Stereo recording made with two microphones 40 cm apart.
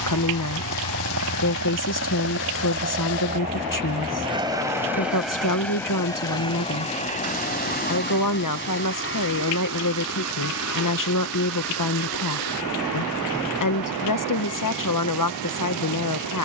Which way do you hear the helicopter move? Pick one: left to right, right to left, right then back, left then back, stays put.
right to left.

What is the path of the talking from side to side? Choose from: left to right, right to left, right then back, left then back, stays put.
stays put.